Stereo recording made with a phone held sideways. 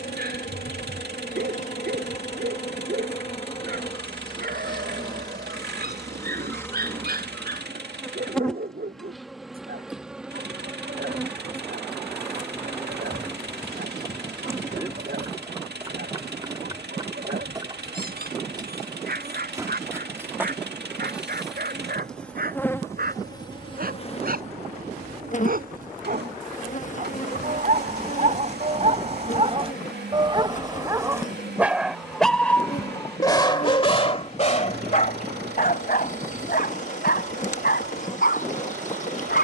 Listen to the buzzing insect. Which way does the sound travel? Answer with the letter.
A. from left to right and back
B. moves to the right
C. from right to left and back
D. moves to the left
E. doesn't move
A.